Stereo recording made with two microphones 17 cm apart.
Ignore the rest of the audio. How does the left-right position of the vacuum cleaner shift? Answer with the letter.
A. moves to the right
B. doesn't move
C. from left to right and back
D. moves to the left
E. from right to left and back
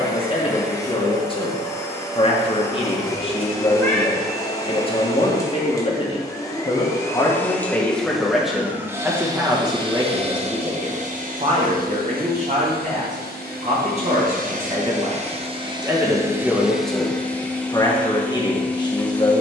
C.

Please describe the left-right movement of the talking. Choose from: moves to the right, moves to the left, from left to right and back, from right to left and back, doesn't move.
from left to right and back.